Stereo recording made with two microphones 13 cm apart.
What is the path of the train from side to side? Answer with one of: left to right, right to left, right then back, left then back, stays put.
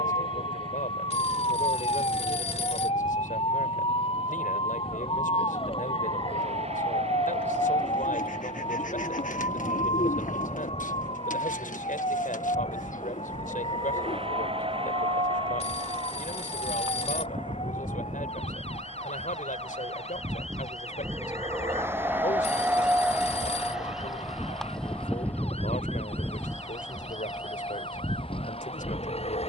right to left.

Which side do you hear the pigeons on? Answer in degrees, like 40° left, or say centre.
70° left.